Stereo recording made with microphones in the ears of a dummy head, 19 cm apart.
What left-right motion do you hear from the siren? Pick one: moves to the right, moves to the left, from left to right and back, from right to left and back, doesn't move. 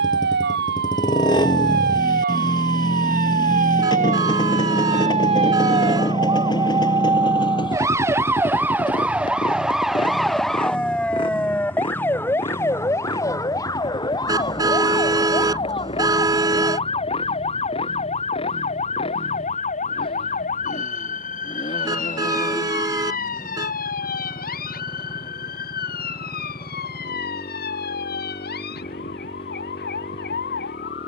moves to the left.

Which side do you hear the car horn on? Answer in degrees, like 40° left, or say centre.
20° right.